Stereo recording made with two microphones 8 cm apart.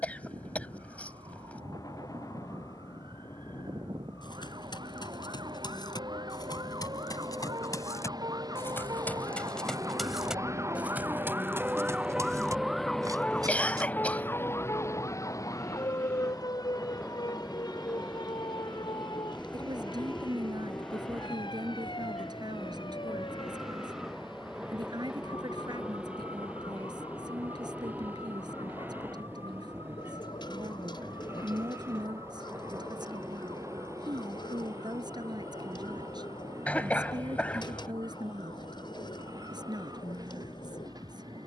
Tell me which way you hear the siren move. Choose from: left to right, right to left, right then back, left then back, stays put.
right to left.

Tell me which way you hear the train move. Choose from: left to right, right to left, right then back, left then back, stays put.
left to right.